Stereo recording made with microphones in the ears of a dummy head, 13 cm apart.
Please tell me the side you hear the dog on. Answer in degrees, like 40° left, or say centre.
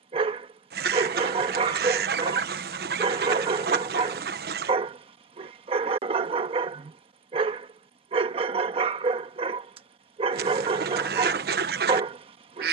40° right.